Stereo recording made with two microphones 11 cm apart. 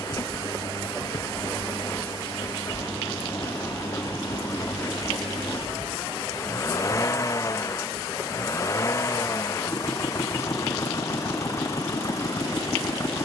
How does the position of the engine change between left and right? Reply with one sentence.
In this clip you hear the engine stay put.